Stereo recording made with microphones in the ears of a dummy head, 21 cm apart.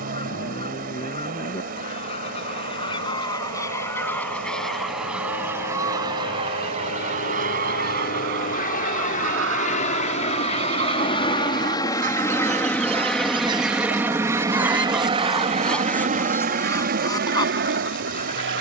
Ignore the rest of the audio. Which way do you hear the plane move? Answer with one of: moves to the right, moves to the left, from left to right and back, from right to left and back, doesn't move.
moves to the right.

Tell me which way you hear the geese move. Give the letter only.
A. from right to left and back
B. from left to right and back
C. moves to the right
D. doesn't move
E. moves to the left
B.